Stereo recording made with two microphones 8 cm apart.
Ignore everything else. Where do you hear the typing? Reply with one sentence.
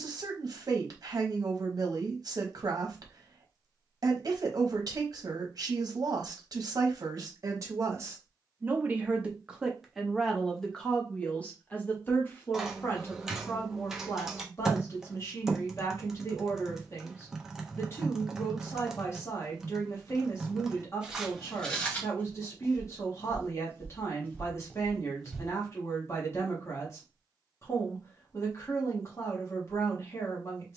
You can hear the typing in the centre.